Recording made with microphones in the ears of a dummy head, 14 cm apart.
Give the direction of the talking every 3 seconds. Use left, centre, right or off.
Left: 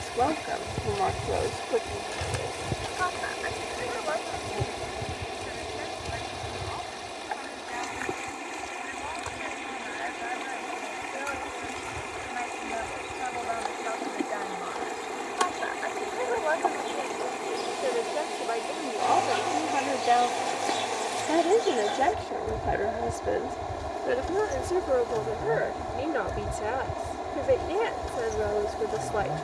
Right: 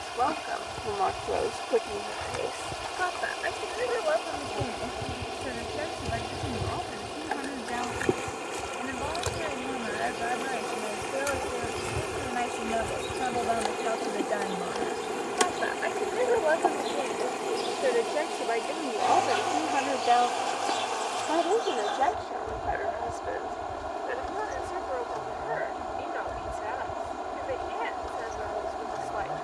centre, right, right, right, right, right, centre, left, left, left.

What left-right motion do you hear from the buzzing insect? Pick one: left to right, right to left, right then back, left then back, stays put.
right then back.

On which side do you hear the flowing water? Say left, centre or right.
centre.